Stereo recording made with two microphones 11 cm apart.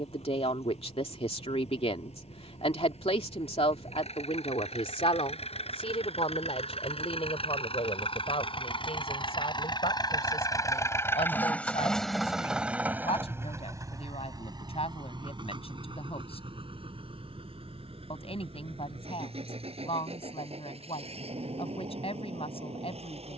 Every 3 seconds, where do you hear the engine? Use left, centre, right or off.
left, left, left, left, right, right, right, right.